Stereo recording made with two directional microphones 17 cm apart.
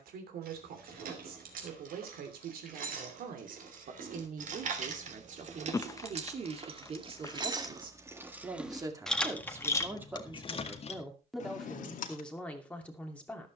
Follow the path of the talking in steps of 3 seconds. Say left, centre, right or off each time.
right, right, right, centre, centre.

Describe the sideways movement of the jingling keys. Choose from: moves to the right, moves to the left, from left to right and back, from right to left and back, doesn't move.
moves to the left.